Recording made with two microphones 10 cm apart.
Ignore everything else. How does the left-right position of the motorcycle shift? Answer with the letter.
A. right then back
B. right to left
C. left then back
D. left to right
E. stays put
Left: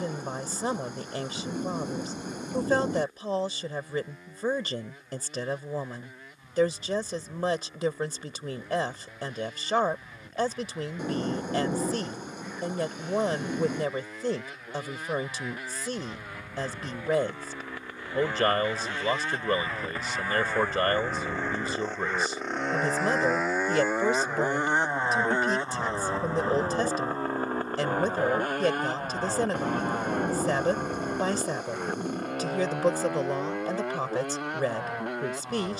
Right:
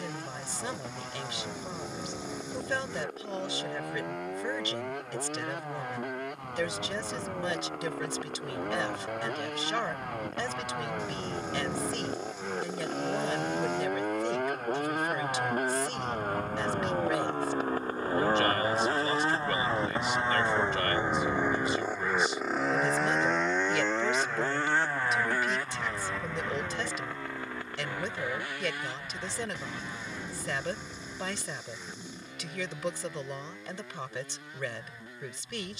B.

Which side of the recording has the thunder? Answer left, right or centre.
left.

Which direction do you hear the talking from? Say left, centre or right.
left.